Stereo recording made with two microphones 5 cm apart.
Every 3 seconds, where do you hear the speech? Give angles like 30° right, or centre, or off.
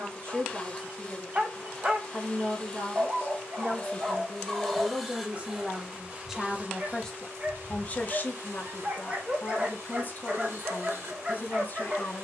50° right, 30° right, 20° left, 40° left.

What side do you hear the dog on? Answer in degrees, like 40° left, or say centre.
30° right.